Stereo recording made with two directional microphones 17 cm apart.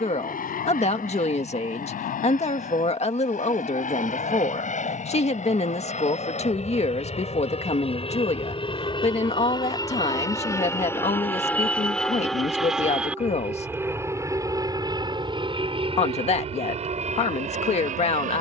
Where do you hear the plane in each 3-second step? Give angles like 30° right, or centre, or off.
60° left, 50° left, 40° left, 20° left, 10° right, 40° right.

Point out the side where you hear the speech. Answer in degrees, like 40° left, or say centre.
40° left.